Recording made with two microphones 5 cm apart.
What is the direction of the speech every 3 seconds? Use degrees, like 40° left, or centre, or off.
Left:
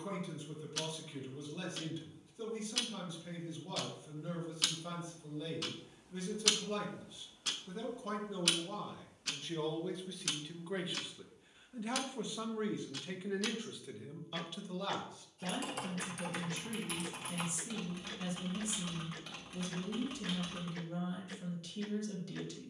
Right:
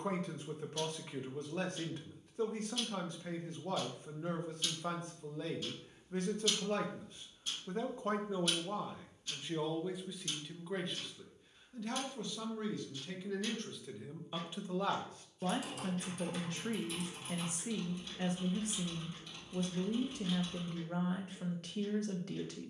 50° right, 50° right, 40° right, centre, 10° left, 50° right, 50° right, 50° right.